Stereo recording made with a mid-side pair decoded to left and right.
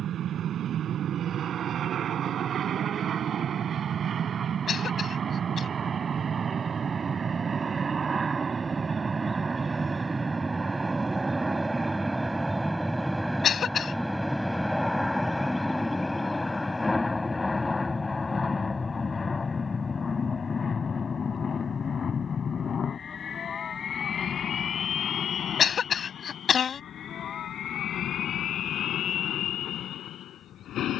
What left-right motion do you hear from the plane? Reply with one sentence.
You can hear the plane go from the right side to the left.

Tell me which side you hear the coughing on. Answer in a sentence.
You can hear the coughing on the left.